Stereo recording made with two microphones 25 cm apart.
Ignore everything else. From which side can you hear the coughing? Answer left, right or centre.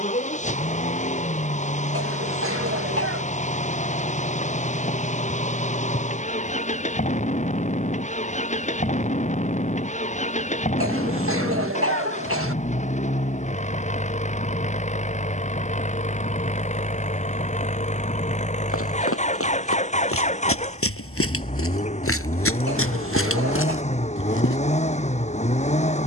right.